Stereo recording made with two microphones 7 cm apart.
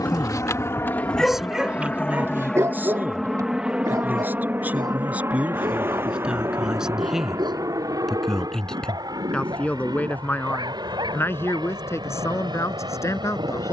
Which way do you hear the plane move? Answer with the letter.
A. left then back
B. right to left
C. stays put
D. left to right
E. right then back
D.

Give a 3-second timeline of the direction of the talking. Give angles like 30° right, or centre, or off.
10° right, 20° right, centre, 30° left, 40° left.